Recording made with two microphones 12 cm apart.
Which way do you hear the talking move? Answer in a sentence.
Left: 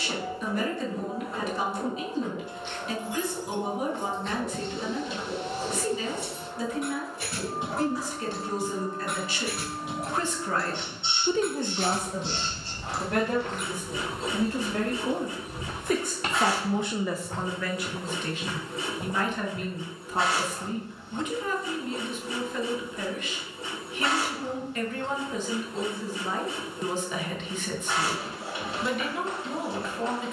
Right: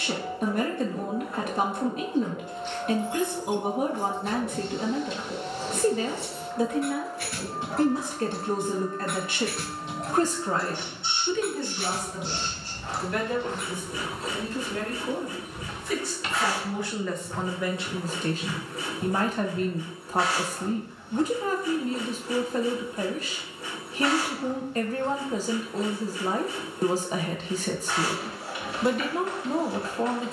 In this clip you hear the talking go left and come back.